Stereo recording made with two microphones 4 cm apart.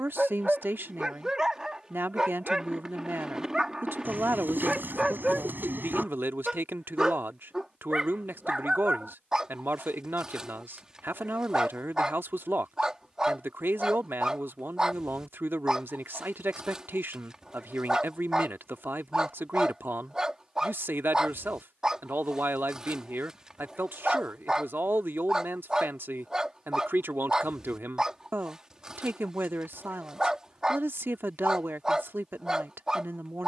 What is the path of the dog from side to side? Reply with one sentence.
You can hear the dog stay in one place.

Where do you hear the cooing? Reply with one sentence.
In this clip you hear the cooing on the right.